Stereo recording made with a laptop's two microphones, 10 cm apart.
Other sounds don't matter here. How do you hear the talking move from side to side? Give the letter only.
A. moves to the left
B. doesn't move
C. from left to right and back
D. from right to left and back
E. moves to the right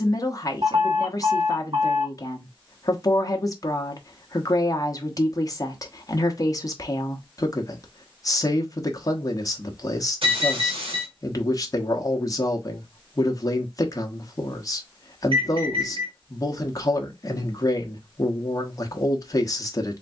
B.